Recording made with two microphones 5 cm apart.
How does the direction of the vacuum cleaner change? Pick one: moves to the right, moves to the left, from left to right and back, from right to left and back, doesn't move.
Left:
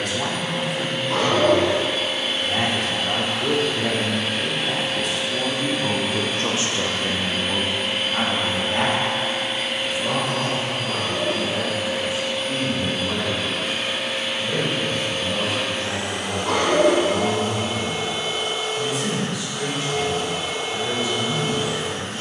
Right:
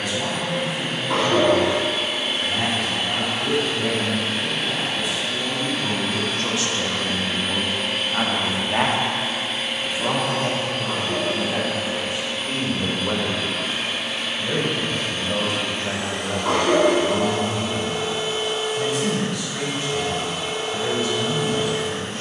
moves to the left.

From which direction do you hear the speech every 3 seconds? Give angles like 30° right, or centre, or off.
70° left, 60° left, 10° left, 40° right, 50° right, 60° right, 60° right, 60° right.